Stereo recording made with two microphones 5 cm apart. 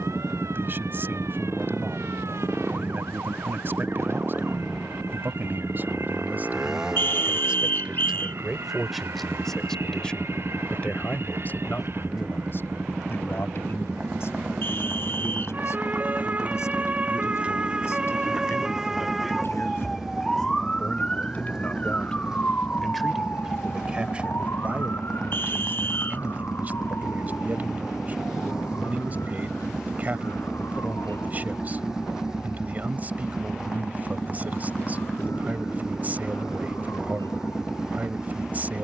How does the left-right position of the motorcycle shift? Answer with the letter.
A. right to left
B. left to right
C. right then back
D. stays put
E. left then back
D.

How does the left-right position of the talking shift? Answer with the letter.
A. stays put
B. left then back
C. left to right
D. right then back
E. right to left
B.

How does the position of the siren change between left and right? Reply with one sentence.
You can hear the siren go from the right side to the left.